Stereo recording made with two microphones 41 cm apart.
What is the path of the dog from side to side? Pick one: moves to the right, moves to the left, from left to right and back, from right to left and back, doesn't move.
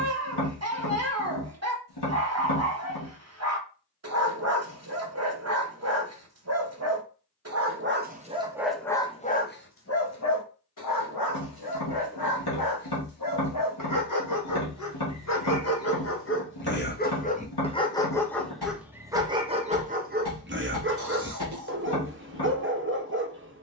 from right to left and back.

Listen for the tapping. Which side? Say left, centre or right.
left.